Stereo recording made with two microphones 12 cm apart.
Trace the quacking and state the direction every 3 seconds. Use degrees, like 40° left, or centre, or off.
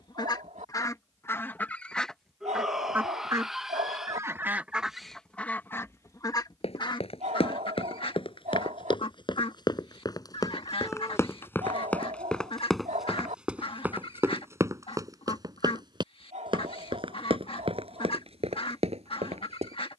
20° left, 10° right, 40° left, 50° left, 50° left, 50° left, 50° left.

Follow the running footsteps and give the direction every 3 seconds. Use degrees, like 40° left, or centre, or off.
off, off, 50° left, 30° left, 10° right, 40° right, 60° right.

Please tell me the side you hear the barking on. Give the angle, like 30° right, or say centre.
80° right.